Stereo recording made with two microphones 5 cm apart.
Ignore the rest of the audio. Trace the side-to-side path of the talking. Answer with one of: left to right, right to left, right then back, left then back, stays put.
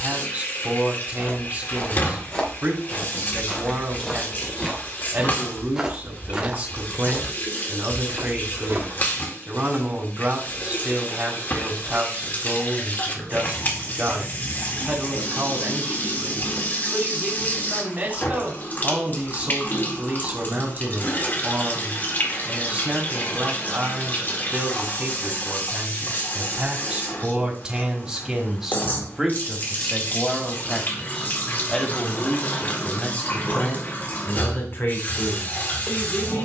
right to left.